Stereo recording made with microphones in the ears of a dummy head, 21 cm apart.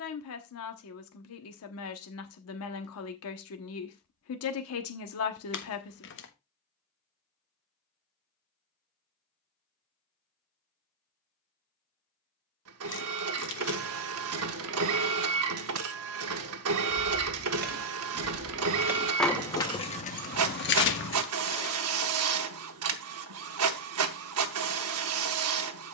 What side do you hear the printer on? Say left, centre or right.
right.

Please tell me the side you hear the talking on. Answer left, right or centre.
left.